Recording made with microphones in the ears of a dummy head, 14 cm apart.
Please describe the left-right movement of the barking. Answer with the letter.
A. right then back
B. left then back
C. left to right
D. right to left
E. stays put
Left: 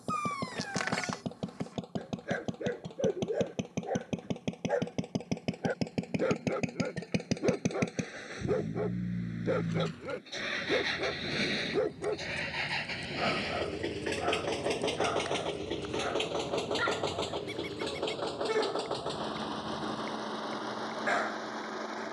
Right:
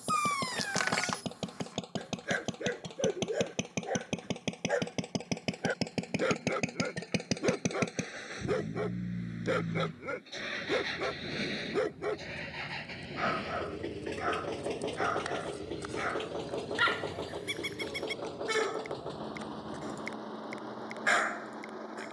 E.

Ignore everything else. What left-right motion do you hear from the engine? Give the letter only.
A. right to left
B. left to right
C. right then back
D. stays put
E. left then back
A.